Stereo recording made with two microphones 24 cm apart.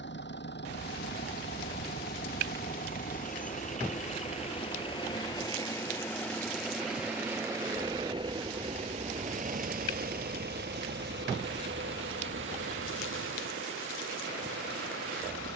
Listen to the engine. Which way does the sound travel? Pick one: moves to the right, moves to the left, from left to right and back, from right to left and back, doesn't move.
moves to the right.